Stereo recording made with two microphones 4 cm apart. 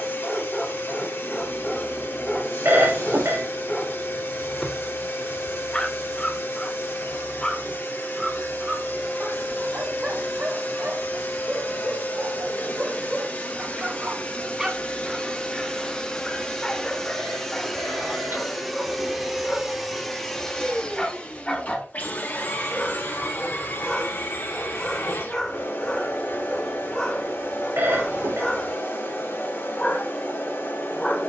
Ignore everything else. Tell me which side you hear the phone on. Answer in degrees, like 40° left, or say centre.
80° right.